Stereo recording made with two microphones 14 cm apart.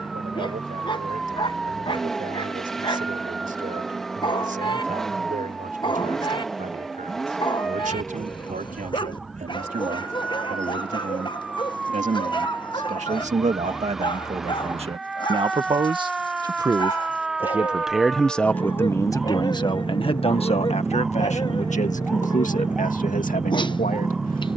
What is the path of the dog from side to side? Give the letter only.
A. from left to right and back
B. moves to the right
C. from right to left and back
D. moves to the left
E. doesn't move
E.